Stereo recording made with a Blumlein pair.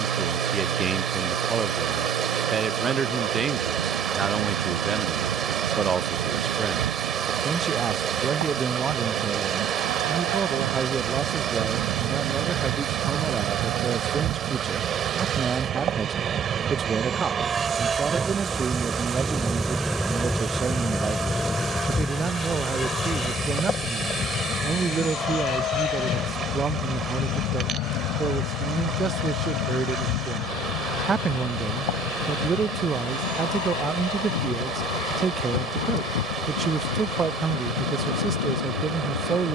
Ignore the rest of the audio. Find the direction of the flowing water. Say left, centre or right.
right.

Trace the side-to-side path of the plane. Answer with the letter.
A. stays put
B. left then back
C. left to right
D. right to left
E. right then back
D.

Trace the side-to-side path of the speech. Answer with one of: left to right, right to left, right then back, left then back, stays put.
stays put.